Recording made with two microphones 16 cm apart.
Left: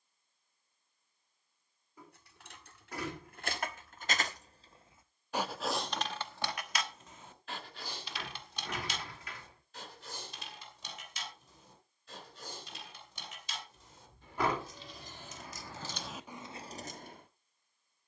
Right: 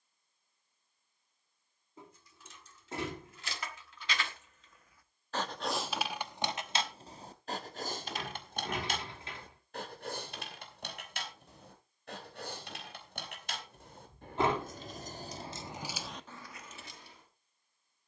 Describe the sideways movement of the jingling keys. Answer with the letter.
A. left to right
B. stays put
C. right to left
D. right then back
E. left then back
D.